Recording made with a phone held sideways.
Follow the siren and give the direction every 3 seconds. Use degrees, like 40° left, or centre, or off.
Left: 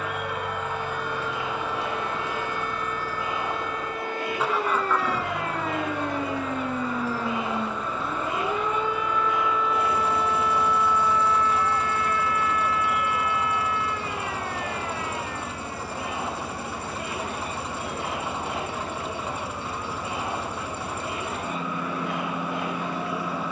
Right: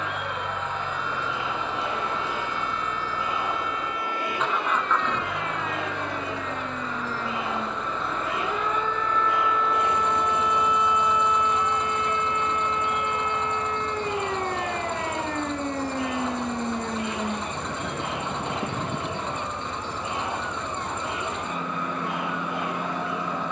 50° left, 40° left, 20° left, centre, 30° right, 50° right, 60° right, 70° right.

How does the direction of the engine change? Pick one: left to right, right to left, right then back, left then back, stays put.
stays put.